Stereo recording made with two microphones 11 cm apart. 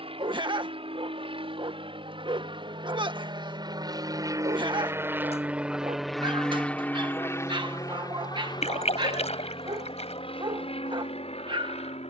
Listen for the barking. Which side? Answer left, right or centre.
right.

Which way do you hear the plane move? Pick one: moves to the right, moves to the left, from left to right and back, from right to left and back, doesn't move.
moves to the left.